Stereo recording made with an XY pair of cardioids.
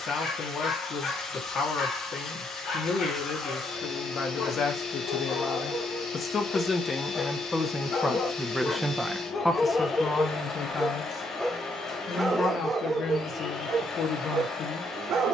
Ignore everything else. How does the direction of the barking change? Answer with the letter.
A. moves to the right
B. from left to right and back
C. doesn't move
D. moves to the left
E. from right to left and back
A.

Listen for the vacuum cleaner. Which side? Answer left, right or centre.
left.